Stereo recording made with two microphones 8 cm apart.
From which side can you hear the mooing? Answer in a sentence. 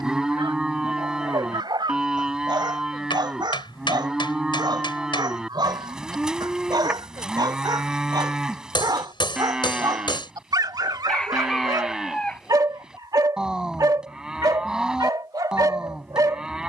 In this clip you hear the mooing in the centre.